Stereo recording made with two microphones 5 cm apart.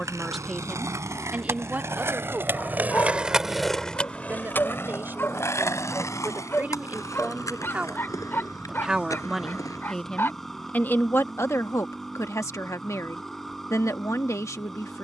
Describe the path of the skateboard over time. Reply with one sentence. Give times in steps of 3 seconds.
You can hear the skateboard on the right from 0 s, on the left from 3 s and not at all from 12 s.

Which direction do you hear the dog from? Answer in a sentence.
You can hear the dog on the left.